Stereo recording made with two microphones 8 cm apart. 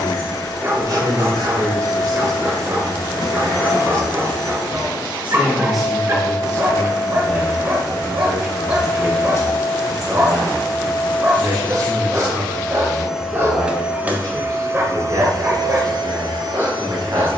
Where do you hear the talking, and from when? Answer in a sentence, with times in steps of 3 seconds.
You can hear the talking on the right from 0 s, in the centre from 6 s and on the right from 9 s.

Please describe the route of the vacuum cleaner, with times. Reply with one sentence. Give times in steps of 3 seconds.
You can hear the vacuum cleaner on the left from 0 s, in the centre from 12 s and on the right from 15 s.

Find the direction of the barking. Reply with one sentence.
You can hear the barking on the right.